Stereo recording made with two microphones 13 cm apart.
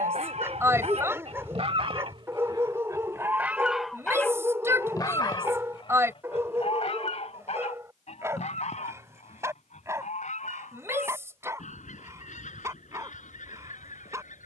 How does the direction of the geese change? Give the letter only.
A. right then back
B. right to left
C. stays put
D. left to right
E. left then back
B.